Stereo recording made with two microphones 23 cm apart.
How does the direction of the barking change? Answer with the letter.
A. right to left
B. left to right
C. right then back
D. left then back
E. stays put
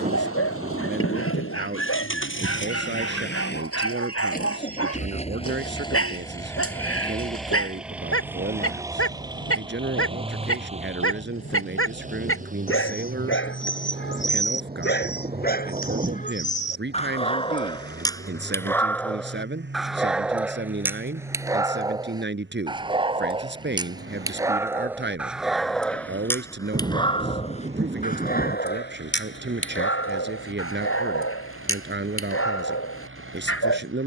C.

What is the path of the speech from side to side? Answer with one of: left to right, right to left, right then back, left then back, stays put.
stays put.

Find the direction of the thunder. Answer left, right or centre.
right.